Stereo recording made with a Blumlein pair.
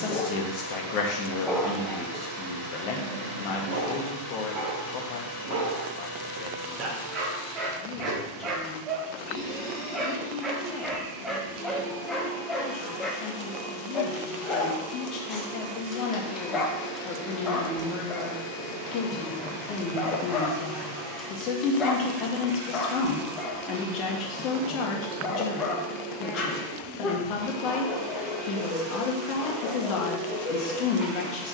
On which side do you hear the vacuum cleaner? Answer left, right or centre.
right.